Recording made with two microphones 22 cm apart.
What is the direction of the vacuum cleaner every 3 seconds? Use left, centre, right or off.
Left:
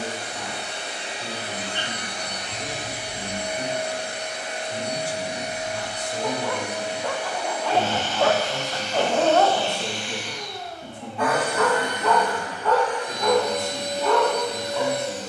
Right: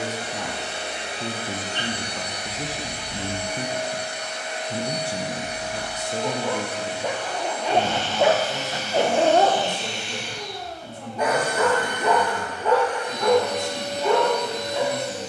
right, left, centre, right, right.